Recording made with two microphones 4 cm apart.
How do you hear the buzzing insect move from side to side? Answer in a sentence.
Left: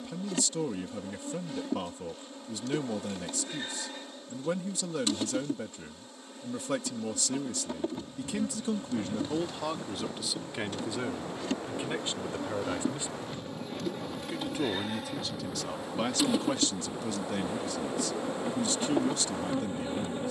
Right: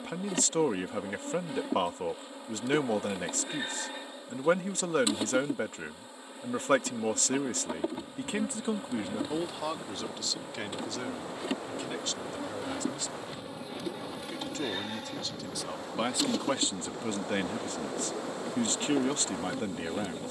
In this clip you hear the buzzing insect move from right to left.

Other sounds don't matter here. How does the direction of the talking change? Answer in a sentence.
You can hear the talking go left and come back.